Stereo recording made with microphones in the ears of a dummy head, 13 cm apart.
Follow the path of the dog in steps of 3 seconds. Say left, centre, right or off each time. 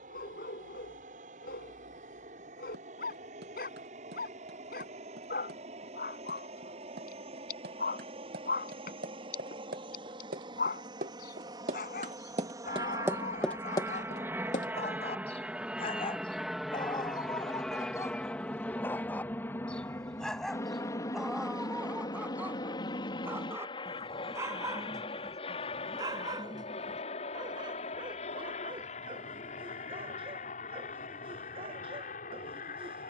left, left, left, left, left, left, centre, centre, right, right, right.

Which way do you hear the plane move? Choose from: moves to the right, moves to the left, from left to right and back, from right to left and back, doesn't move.
moves to the left.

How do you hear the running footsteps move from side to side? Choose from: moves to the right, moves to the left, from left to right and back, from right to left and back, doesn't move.
moves to the left.